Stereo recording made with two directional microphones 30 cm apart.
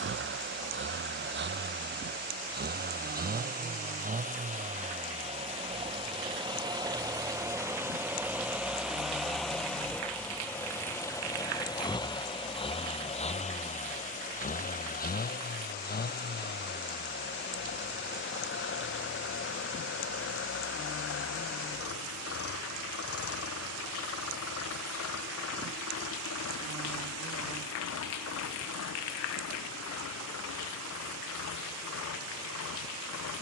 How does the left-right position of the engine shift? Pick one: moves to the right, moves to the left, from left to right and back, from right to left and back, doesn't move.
moves to the left.